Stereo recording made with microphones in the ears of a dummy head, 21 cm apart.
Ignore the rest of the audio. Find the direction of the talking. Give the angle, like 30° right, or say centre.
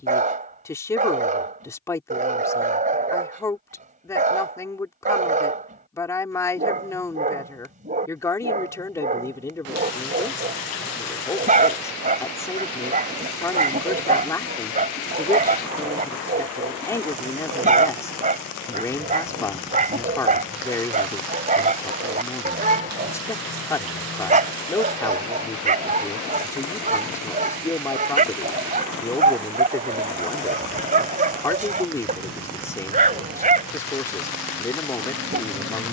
10° left.